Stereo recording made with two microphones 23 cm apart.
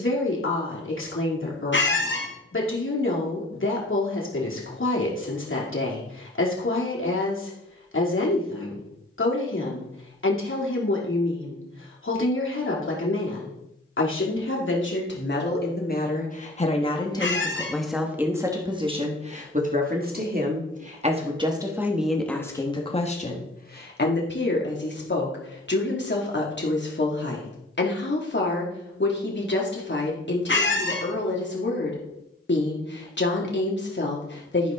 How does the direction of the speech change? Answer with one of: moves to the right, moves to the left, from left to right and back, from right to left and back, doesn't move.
from left to right and back.